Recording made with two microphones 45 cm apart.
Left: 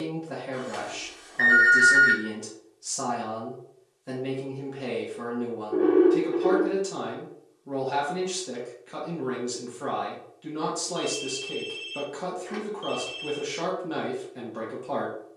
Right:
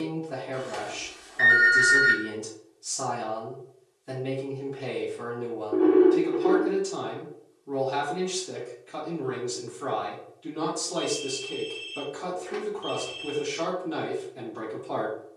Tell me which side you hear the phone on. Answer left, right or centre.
right.